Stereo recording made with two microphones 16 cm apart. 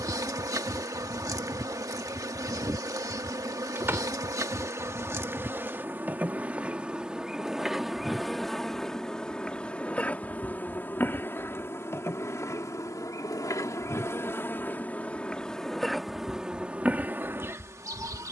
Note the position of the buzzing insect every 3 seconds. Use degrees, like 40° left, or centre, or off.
20° right, 20° right, centre, 10° left, 20° left, 10° right.